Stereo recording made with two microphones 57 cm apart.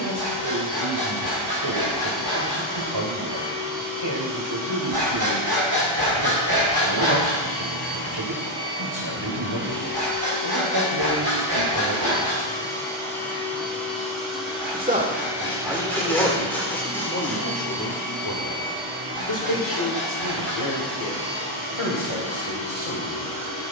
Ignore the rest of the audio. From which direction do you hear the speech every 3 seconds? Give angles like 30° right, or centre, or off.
50° right, 50° right, 50° right, 50° right, 30° right, 10° left, 50° left, 60° left.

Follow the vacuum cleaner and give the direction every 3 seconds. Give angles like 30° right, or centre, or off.
40° left, 40° left, 30° left, 20° left, centre, 10° right, 20° right, 30° right.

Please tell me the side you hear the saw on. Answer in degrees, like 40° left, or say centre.
40° right.